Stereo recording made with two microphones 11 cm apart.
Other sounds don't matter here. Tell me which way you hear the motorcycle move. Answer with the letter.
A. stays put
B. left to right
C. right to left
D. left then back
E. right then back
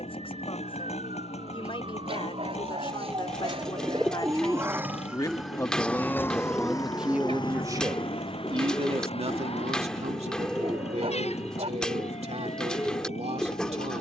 A.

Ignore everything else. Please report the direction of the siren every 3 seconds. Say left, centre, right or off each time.
right, right, left, left, left.